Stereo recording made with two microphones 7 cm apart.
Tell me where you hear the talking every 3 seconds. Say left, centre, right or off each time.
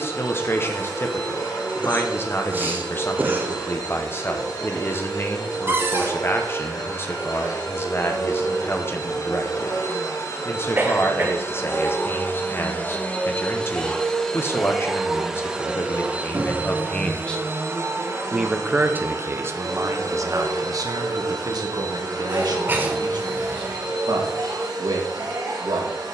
left, left, left, left, left, left, right, right, right.